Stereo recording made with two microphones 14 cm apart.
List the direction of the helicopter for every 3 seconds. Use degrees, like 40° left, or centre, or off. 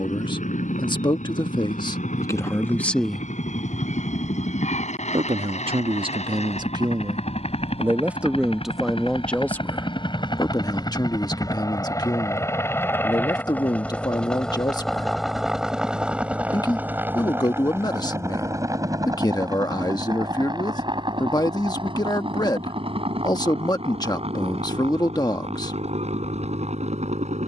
70° left, 60° left, 50° left, 30° left, 10° left, 10° right, 30° right, 40° right, 40° right.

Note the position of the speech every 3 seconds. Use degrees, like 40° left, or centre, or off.
30° left, 30° right, 20° right, 20° left, 30° left, 30° left, 30° left, 30° left, 30° left.